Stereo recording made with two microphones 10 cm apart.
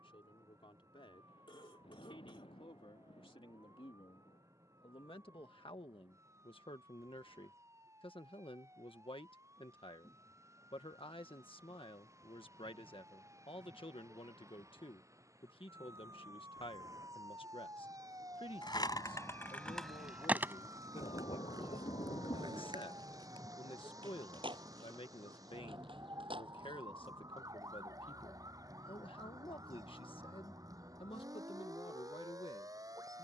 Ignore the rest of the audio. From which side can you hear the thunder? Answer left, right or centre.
left.